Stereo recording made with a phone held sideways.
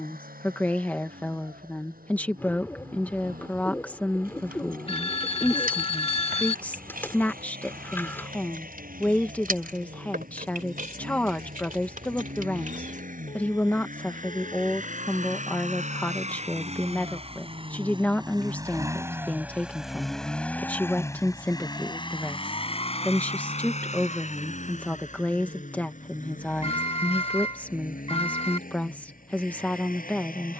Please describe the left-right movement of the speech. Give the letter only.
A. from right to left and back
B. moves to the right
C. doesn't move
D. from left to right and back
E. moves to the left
C.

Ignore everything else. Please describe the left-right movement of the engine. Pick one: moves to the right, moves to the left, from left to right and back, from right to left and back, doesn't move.
moves to the left.